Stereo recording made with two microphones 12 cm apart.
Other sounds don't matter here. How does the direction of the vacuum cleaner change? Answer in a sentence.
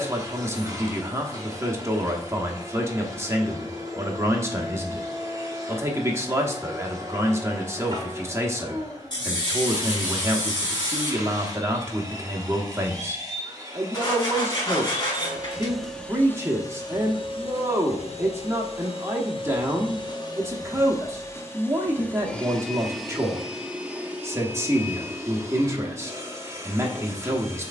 In this clip you hear the vacuum cleaner move from right to left and back again.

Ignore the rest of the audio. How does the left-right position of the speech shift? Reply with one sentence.
You can hear the speech stay put.